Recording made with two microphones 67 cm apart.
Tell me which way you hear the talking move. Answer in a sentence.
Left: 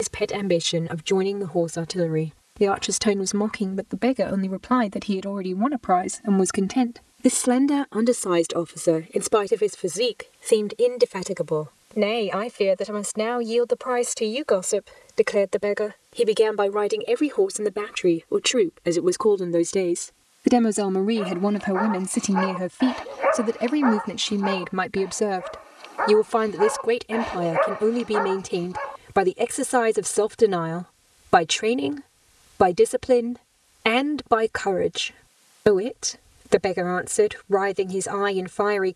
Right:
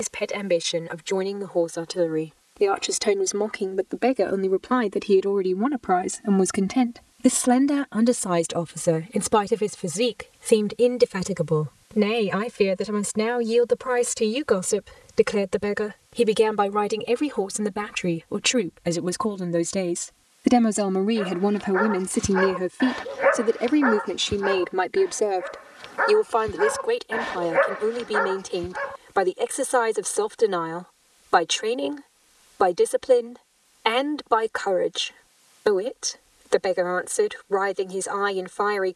In this clip you hear the talking move from left to right and back again.